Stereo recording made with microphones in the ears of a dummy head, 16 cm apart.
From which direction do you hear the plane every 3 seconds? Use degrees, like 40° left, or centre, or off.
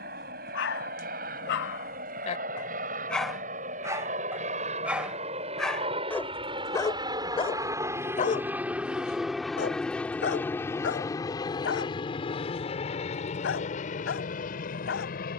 60° right, 40° right, 20° right, 10° left, 40° left.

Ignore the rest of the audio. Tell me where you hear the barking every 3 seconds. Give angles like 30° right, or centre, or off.
60° left, centre, 30° left, 70° left, 80° left.